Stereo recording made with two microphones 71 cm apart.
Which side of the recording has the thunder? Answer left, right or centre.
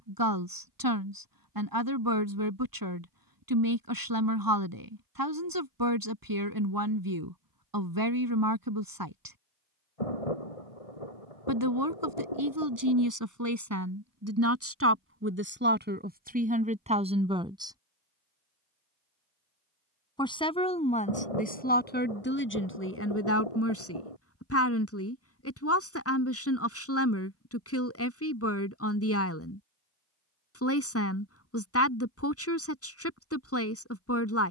left.